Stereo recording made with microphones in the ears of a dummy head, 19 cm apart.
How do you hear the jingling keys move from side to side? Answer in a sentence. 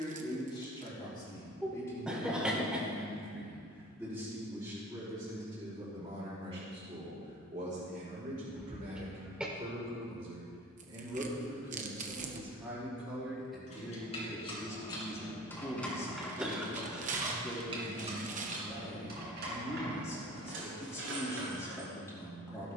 In this clip you hear the jingling keys go from the left side to the right.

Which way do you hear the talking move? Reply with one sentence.
You can hear the talking move from left to right and back again.